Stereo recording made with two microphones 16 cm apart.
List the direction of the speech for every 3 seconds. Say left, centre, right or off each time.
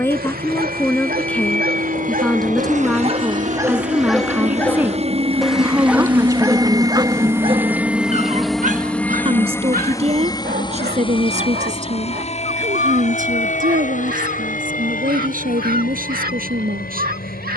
centre, centre, right, right, right, right.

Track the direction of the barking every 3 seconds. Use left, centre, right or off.
right, centre, right, right, right, right.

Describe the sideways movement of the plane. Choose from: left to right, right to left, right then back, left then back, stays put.
right to left.